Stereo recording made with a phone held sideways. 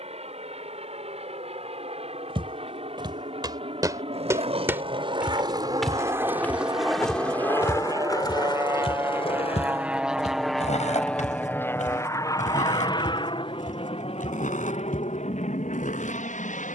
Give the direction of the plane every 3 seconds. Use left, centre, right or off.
right, right, right, centre, left, left.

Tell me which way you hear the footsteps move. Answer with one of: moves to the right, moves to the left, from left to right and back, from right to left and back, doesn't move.
moves to the left.